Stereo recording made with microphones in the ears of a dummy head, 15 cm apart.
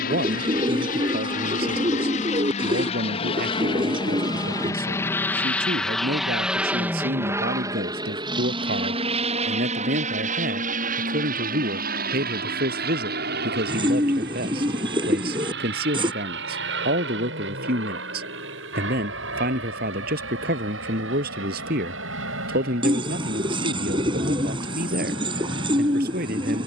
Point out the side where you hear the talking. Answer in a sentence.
You can hear the talking on the right.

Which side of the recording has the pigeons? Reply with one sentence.
You can hear the pigeons on the right.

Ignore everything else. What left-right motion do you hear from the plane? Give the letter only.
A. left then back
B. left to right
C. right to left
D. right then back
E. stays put
B.